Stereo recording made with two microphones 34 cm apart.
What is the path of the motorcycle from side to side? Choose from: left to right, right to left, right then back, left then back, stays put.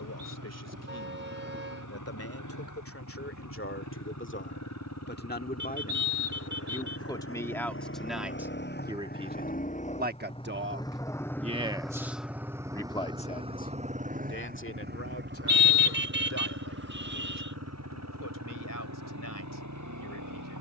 left to right.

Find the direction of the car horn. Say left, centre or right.
right.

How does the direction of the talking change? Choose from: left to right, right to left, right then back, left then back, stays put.
right then back.